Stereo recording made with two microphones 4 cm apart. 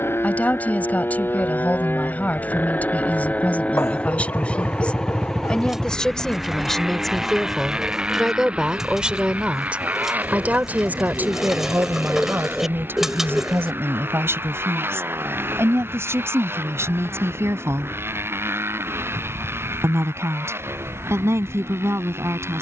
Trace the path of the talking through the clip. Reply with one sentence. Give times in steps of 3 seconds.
You can hear the talking on the left from 0 s, in the centre from 6 s and on the right from 9 s.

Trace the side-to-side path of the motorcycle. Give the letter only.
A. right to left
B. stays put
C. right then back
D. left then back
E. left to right
E.